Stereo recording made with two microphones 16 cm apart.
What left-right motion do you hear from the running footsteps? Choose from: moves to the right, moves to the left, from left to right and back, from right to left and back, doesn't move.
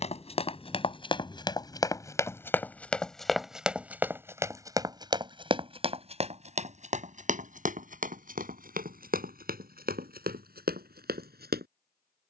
moves to the right.